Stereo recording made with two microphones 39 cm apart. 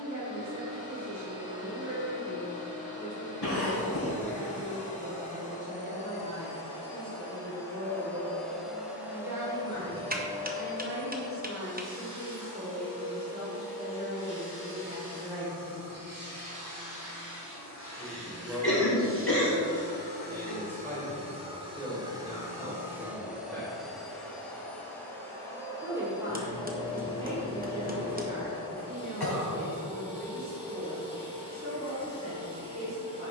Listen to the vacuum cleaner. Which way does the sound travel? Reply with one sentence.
You can hear the vacuum cleaner move from left to right and back again.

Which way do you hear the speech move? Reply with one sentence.
You can hear the speech go left and come back.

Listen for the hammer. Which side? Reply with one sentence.
You can hear the hammer on the right.